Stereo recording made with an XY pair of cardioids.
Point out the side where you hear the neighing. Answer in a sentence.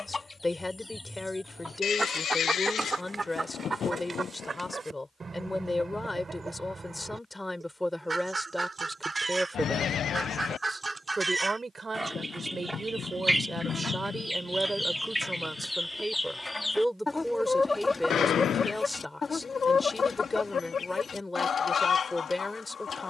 You can hear the neighing on the left.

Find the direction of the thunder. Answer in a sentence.
In this clip you hear the thunder on the left.